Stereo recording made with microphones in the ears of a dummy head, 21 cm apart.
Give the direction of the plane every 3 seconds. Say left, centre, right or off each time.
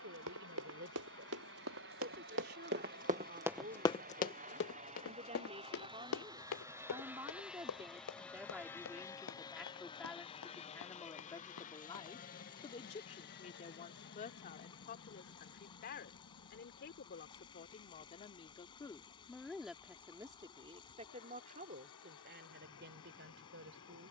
right, right, centre, left, left, left, left, left.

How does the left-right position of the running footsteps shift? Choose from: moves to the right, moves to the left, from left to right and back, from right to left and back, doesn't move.
moves to the left.